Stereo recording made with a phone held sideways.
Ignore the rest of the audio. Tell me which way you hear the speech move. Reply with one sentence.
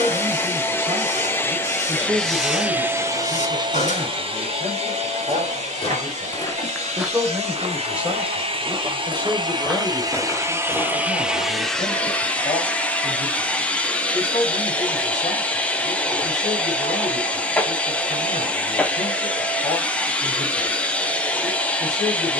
In this clip you hear the speech move to the left.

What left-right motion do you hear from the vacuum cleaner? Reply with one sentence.
You can hear the vacuum cleaner move from left to right and back again.